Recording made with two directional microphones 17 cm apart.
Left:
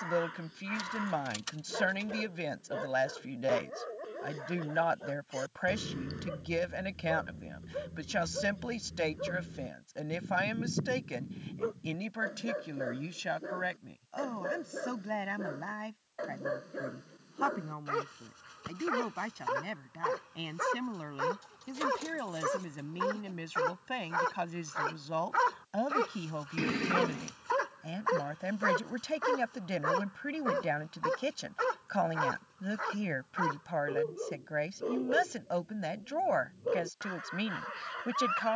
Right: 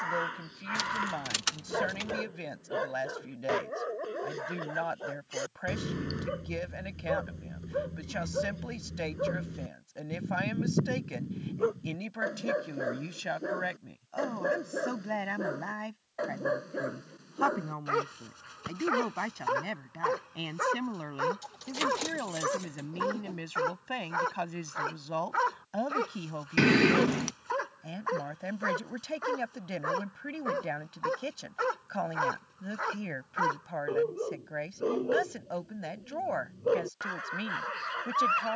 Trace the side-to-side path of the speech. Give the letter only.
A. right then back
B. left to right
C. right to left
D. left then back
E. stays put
A.